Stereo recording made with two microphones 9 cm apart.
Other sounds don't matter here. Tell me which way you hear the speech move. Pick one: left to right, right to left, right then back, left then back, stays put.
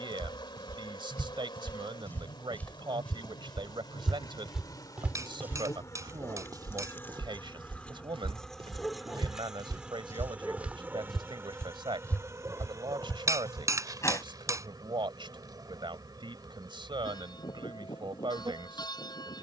stays put.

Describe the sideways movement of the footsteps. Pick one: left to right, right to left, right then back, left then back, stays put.
right then back.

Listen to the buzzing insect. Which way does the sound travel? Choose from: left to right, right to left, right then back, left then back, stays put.
left to right.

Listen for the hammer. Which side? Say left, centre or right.
right.